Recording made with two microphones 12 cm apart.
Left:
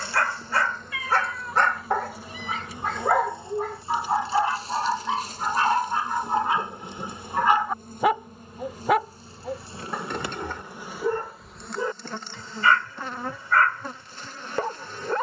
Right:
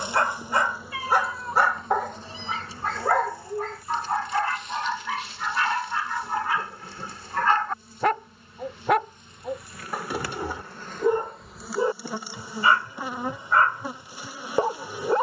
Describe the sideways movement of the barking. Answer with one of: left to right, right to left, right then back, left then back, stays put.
left then back.